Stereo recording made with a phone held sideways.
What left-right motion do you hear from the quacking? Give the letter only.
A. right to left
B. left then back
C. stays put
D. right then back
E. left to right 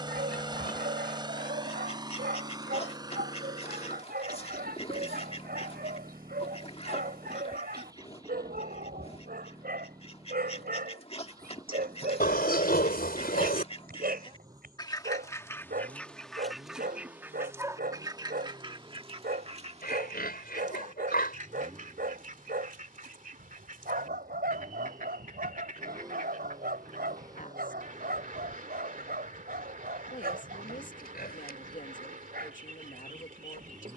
E.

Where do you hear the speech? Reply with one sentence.
In this clip you hear the speech on the left.